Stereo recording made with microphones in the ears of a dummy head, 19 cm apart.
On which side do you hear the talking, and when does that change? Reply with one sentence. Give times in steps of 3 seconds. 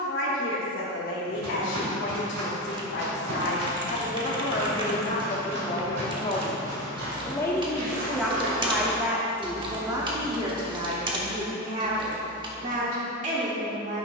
You can hear the talking on the left from 0 s, in the centre from 6 s and on the right from 9 s.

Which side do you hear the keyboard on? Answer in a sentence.
In this clip you hear the keyboard on the right.